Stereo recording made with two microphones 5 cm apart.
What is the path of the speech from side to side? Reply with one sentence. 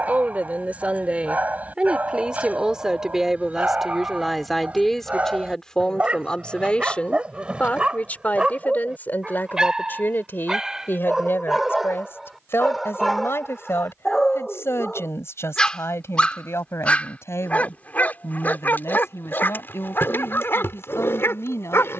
You can hear the speech travel towards the left.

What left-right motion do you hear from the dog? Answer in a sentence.
In this clip you hear the dog move to the left.